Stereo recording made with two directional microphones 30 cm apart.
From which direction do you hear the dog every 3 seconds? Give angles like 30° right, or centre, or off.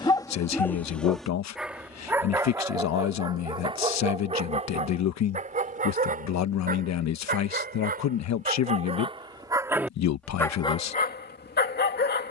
centre, 20° right, 30° right, 10° left.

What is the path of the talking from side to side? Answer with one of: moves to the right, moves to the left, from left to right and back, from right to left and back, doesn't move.
doesn't move.